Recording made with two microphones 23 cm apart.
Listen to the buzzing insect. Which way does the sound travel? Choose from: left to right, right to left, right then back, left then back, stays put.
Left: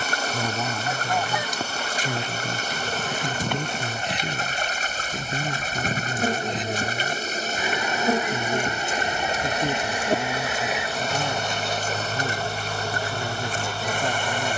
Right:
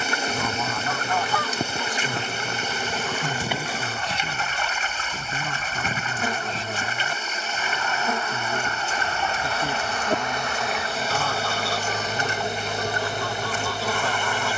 left then back.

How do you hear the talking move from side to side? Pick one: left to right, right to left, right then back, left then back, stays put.
stays put.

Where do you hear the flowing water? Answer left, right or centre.
left.